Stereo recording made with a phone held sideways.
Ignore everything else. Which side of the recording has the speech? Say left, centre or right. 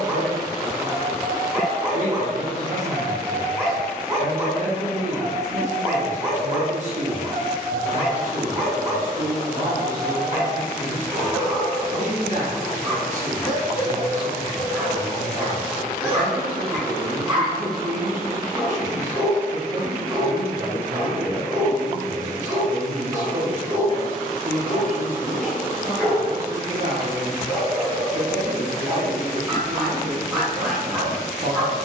right.